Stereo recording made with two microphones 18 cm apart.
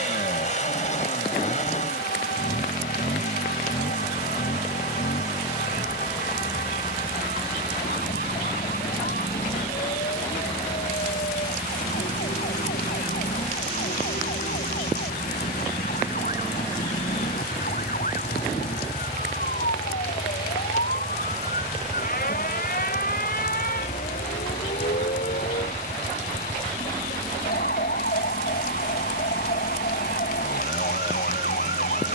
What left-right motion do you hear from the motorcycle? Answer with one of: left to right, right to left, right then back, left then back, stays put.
stays put.